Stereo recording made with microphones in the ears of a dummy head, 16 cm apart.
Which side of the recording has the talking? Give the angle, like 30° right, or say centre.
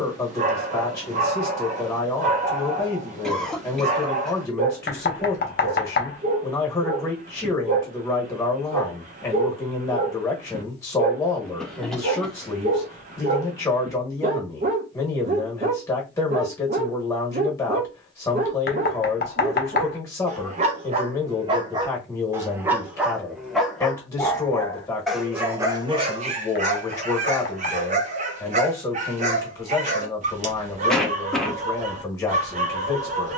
20° left.